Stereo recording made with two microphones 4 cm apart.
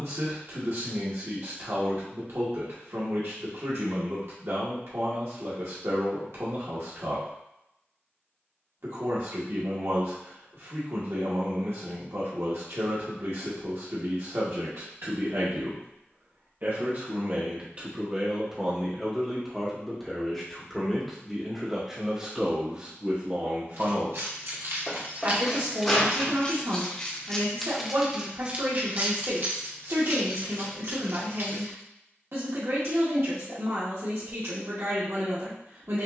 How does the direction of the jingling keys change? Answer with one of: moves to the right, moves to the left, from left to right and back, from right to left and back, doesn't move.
from right to left and back.